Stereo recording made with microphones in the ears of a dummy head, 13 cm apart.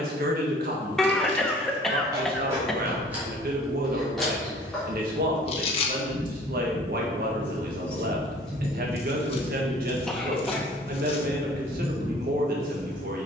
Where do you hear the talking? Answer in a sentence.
In this clip you hear the talking on the right.